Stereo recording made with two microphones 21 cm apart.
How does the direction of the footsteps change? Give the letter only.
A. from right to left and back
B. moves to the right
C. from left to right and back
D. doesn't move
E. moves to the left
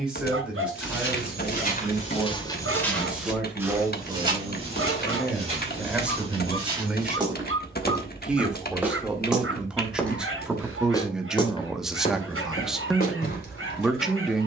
C.